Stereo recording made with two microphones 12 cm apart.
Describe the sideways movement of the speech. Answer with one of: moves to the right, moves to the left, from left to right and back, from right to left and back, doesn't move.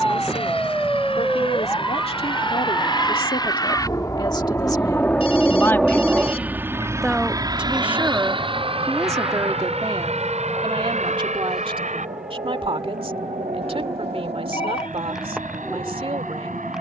moves to the right.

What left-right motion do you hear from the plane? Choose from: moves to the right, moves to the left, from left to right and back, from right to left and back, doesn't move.
moves to the right.